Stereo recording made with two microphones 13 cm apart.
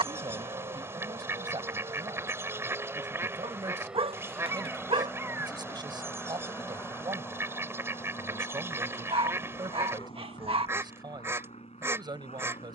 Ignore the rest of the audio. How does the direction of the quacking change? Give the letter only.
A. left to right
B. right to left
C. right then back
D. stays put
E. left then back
D.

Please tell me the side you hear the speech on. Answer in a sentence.
In this clip you hear the speech on the right.